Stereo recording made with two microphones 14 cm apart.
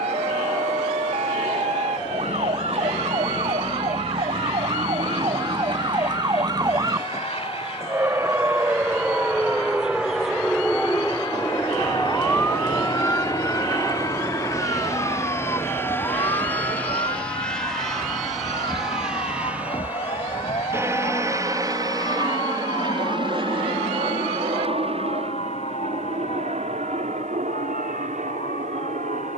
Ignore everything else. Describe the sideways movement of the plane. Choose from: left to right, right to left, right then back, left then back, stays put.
left to right.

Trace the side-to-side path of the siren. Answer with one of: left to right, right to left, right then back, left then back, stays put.
right to left.